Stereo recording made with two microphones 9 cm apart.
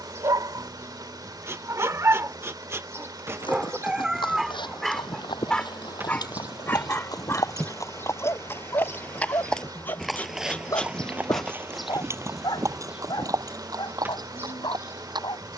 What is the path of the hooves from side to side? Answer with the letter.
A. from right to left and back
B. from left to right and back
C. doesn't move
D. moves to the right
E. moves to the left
D.